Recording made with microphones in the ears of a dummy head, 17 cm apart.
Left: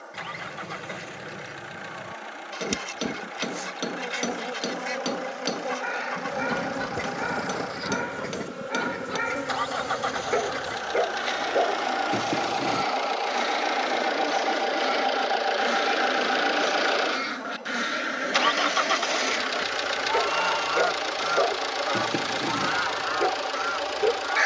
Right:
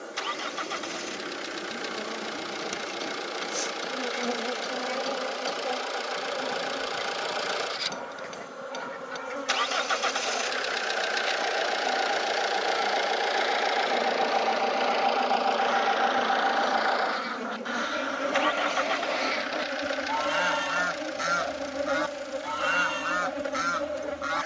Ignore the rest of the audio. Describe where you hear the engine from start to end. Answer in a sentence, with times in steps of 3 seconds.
You can hear the engine on the right from 0 s, in the centre from 12 s and on the left from 15 s.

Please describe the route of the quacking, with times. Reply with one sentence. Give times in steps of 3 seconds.
In this clip you hear the quacking on the left from 0 s, in the centre from 18 s and on the right from 21 s.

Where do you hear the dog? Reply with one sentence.
You can hear the dog on the left.